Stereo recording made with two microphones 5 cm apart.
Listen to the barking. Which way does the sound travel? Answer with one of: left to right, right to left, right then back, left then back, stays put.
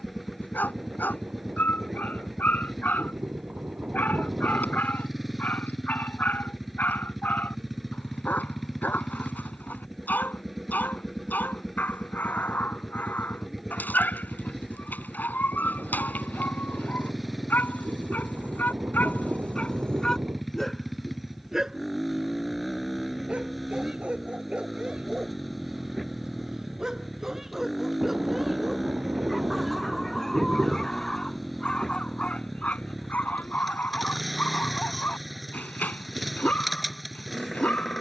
right then back.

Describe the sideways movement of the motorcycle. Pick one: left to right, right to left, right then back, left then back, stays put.
stays put.